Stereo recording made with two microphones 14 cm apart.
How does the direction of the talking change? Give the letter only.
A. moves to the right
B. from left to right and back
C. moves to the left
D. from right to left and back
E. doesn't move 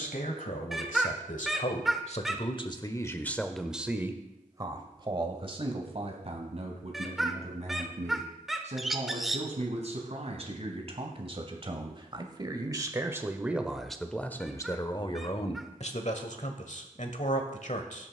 B.